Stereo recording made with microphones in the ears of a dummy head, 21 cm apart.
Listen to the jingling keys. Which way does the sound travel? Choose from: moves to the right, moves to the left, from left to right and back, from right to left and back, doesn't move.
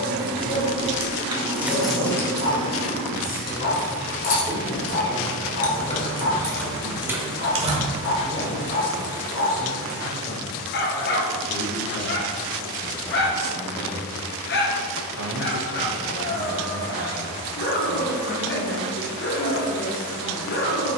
from right to left and back.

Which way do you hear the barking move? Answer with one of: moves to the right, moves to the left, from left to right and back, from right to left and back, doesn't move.
doesn't move.